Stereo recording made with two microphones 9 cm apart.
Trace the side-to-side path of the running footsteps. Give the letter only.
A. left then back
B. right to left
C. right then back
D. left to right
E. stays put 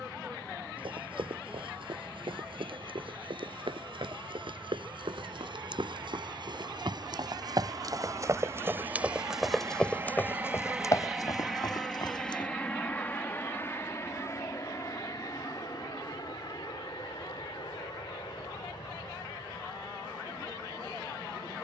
B.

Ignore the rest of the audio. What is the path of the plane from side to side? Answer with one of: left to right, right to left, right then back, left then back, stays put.
right to left.